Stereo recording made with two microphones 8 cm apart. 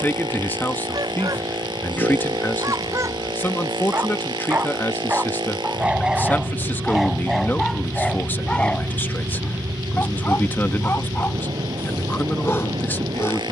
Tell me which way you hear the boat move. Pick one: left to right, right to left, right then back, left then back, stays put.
stays put.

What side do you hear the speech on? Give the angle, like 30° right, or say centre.
30° left.